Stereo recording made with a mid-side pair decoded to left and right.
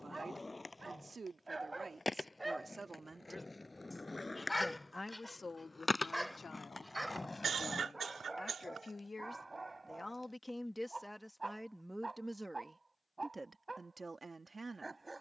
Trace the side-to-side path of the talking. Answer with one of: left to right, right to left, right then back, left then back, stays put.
left then back.